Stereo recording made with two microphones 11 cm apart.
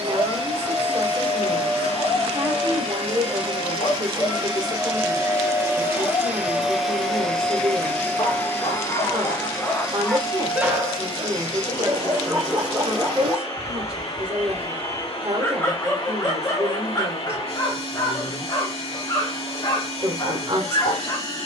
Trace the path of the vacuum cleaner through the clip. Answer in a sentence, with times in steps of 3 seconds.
In this clip you hear the vacuum cleaner on the right from 0 s, in the centre from 6 s and on the left from 9 s.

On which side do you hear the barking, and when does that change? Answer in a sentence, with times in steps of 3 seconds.
In this clip you hear the barking on the left from 0 s, in the centre from 9 s and on the left from 15 s.